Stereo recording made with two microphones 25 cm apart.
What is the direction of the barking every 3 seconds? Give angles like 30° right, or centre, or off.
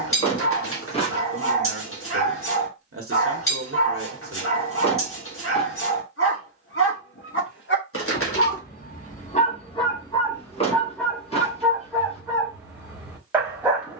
60° left, 60° left, 50° left, 10° left, 10° right.